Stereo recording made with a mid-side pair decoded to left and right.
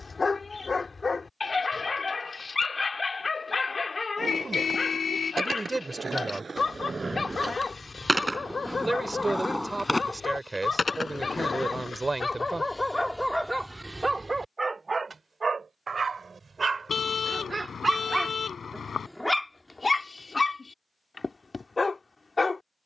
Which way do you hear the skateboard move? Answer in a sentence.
In this clip you hear the skateboard move to the left.